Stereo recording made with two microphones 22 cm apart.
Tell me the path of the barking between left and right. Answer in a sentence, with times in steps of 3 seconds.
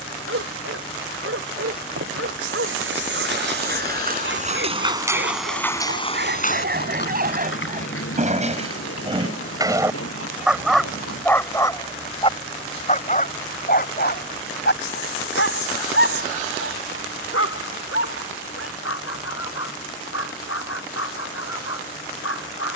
In this clip you hear the barking on the right from 0 s, in the centre from 9 s and on the left from 12 s.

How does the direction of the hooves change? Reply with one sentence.
In this clip you hear the hooves move to the left.